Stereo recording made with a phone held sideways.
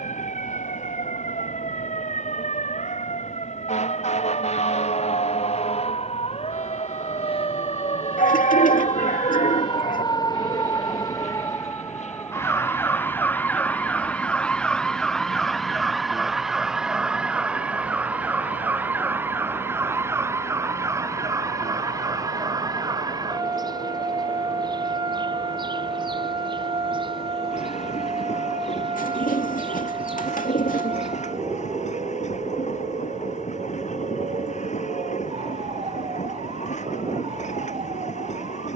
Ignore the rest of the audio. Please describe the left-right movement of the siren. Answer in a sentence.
You can hear the siren move to the right.